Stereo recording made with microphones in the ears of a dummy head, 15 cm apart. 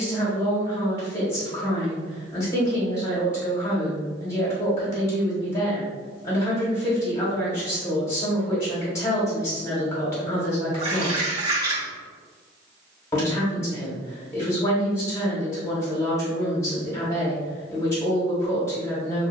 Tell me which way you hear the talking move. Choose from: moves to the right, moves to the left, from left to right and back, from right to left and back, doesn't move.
doesn't move.